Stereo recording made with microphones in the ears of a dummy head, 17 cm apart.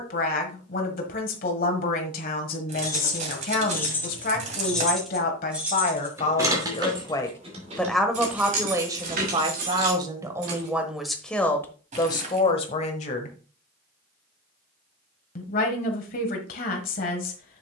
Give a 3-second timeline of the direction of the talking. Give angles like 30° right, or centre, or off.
50° left, 50° left, 10° left, 10° right, 30° left, 50° left.